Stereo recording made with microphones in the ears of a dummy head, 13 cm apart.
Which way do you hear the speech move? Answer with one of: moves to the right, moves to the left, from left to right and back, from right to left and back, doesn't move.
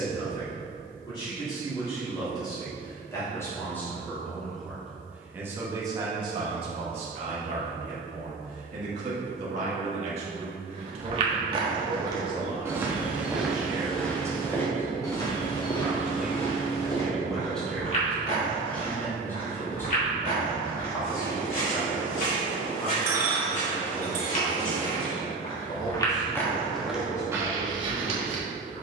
from left to right and back.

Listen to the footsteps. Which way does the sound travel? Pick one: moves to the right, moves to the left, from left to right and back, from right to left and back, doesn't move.
from right to left and back.